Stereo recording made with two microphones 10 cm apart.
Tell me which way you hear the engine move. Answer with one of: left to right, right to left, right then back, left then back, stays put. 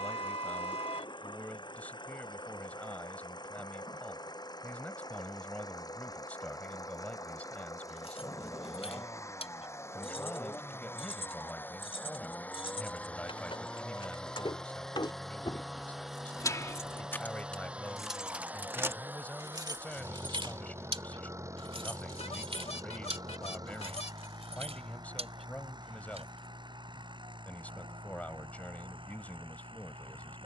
left to right.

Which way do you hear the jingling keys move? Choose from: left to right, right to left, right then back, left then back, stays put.
left to right.